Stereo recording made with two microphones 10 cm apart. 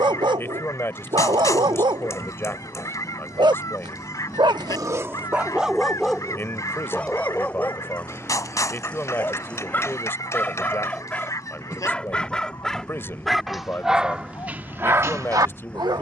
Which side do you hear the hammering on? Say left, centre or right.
left.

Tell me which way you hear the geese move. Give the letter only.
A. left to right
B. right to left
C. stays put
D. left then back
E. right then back
C.